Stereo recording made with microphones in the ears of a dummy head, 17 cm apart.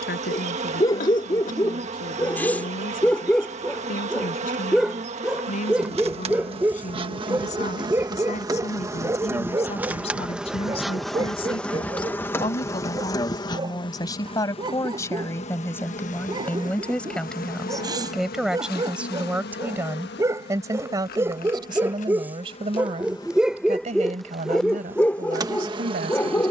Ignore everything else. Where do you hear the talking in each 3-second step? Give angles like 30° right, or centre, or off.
50° left, 50° left, 40° left, 30° left, 20° left, 10° left, 10° right, 30° right, 50° right.